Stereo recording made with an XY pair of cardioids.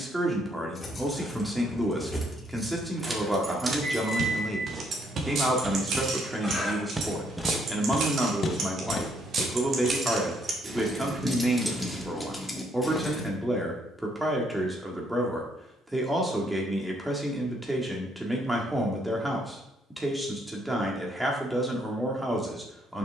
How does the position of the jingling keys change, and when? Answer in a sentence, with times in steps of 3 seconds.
In this clip you hear the jingling keys in the centre from 0 s, on the right from 3 s, in the centre from 12 s and not at all from 15 s.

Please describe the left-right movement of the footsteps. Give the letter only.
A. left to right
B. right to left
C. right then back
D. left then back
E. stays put
B.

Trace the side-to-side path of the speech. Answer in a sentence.
In this clip you hear the speech stay in one place.